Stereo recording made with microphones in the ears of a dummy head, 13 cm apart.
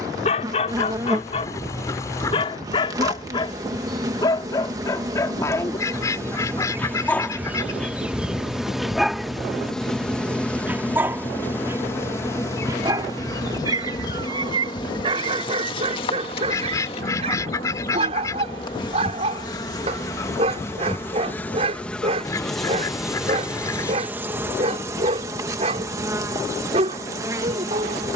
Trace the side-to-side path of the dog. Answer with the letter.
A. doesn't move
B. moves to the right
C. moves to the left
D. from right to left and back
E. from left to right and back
B.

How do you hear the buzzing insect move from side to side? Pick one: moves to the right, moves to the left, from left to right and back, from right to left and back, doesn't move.
from right to left and back.